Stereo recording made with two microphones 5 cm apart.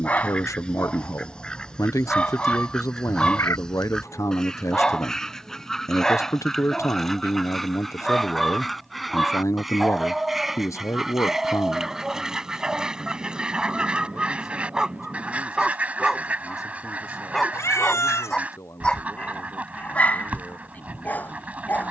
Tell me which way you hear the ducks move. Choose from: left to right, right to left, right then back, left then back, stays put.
left to right.